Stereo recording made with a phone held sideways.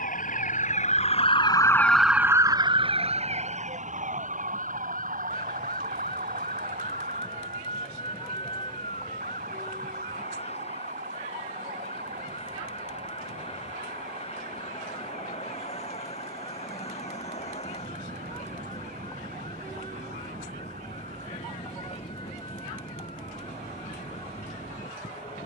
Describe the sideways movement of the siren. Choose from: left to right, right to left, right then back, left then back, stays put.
left to right.